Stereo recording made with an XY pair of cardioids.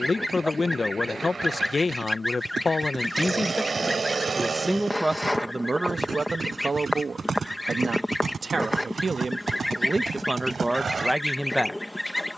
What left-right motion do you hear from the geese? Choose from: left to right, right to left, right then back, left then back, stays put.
stays put.